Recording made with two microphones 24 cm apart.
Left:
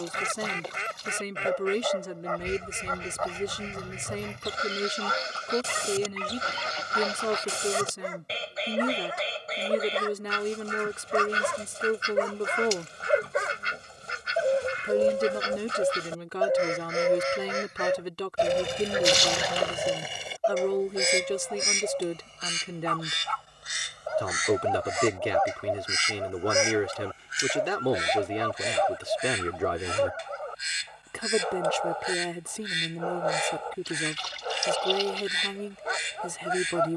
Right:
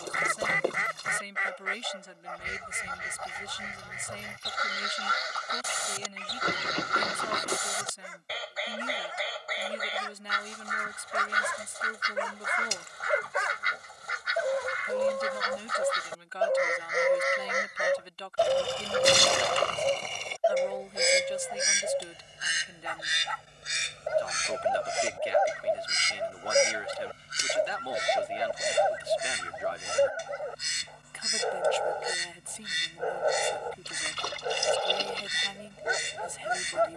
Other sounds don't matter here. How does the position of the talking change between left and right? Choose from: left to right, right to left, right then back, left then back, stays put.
stays put.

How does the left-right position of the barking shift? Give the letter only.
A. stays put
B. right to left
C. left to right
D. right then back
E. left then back
C.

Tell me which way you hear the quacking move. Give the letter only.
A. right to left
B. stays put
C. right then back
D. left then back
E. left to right
E.